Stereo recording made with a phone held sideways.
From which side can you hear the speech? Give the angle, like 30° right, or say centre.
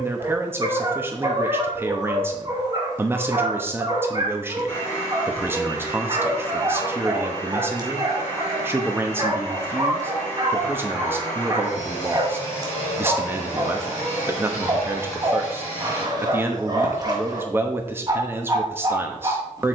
20° right.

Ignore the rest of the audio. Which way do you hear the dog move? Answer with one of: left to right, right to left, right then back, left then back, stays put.
stays put.